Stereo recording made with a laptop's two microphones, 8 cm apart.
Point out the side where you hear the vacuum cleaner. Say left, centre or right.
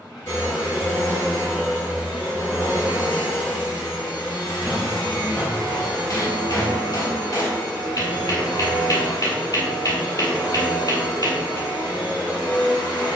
left.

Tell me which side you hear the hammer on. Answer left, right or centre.
left.